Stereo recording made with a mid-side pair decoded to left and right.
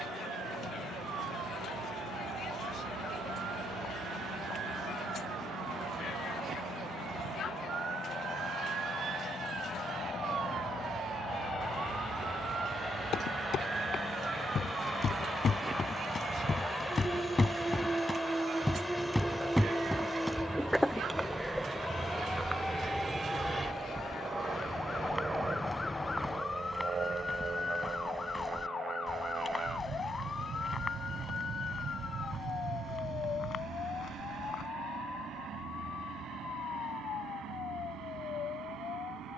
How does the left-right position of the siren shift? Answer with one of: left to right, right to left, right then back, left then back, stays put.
right to left.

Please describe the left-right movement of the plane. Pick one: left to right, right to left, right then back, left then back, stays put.
left to right.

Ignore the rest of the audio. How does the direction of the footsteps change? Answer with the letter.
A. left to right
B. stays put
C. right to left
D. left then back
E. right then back
E.